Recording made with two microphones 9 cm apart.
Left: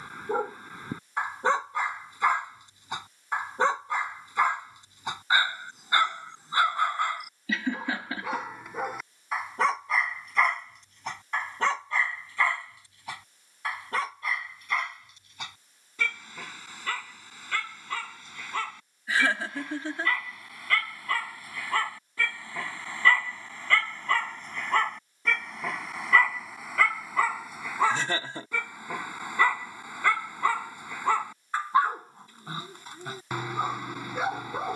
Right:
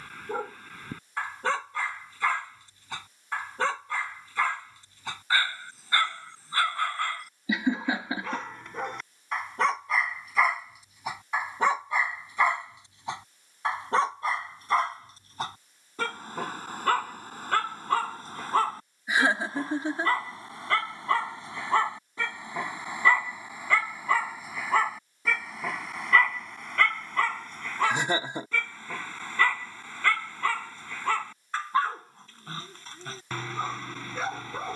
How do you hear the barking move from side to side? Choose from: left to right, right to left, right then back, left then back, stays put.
right then back.